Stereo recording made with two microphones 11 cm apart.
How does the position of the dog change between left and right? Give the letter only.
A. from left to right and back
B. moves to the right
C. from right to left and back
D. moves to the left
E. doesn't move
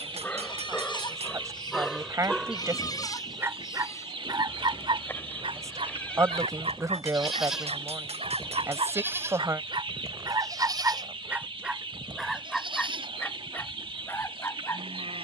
A.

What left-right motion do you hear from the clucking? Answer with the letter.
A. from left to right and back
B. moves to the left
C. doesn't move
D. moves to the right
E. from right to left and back
C.